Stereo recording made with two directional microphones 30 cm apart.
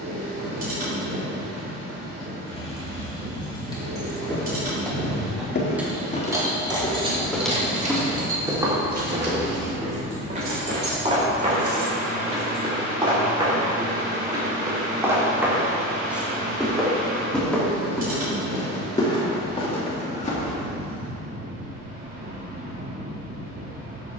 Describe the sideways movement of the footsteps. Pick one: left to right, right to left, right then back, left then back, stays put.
right then back.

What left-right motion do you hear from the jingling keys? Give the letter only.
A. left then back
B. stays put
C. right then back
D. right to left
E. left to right
E.